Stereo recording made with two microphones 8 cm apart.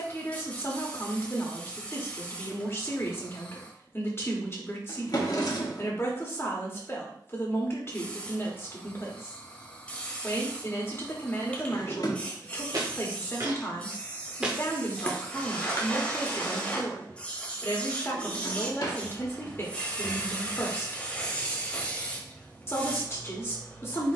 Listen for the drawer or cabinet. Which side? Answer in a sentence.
You can hear the drawer or cabinet on the left.